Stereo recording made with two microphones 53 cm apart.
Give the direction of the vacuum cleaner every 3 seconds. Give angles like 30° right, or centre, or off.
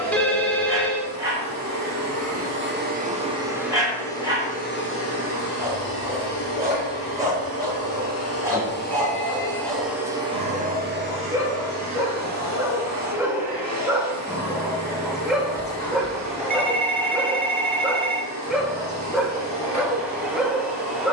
30° right, 10° left, 40° left, 10° right, 30° right, 30° right, 30° right.